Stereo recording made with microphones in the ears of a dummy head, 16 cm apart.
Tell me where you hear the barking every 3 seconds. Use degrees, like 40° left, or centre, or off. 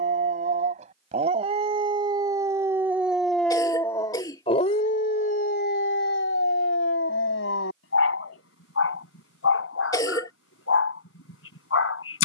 30° right, 30° left, 70° left, 80° left.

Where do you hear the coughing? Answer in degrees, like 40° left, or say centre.
20° left.